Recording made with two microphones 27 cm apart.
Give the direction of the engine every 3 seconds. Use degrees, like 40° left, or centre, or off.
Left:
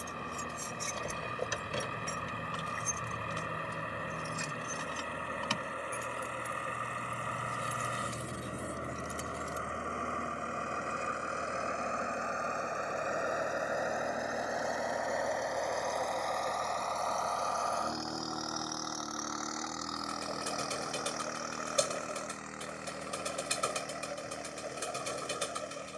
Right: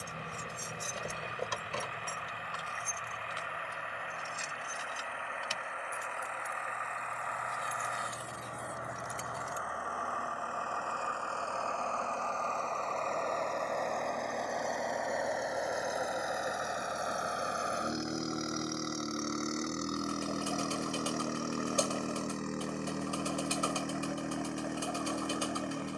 50° left, 40° left, 40° left, 30° left, 10° left, 10° right, 30° right, 50° right, 60° right.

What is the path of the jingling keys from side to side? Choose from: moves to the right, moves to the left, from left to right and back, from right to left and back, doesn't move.
from right to left and back.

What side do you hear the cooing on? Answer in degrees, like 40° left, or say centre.
20° left.